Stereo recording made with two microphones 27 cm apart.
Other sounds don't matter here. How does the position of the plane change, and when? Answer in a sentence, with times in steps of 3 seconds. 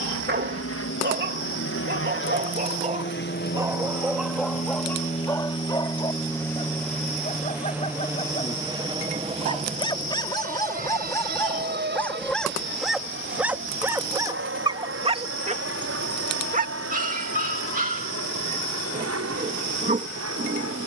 You can hear the plane on the left from 0 s, in the centre from 6 s and on the right from 9 s.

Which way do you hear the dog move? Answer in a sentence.
You can hear the dog go left and come back.